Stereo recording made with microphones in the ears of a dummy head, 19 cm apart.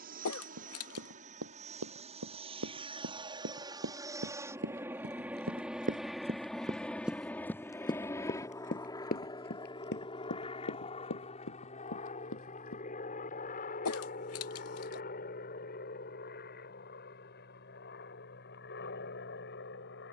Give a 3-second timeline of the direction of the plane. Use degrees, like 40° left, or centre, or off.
30° right, 10° right, 10° left, 20° left, 40° left, 40° left, 50° left.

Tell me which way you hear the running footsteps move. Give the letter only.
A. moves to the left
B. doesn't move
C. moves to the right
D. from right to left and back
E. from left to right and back
A.